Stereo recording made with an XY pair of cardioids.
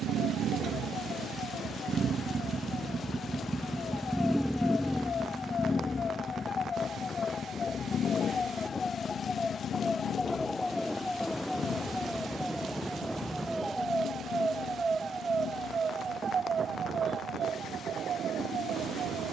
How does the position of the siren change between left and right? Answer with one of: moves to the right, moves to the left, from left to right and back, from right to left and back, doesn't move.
moves to the right.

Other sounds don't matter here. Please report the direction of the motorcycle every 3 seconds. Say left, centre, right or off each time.
right, centre, left, left, left, left, left.